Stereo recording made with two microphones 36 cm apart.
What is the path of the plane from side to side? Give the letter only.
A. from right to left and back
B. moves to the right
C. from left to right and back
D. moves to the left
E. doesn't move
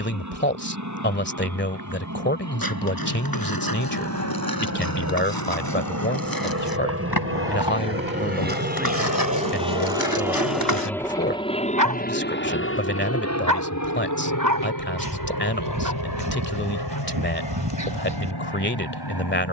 D.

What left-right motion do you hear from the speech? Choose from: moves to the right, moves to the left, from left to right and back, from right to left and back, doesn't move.
doesn't move.